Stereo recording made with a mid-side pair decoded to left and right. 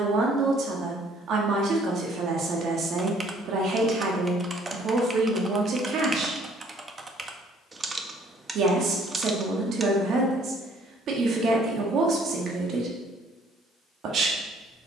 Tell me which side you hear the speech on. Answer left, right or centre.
right.